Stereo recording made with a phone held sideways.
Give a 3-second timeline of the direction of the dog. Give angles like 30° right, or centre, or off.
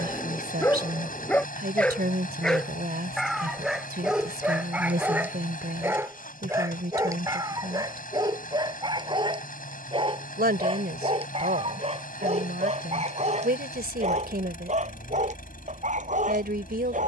10° left, 10° right, 20° right, 30° right, 40° right, 50° right.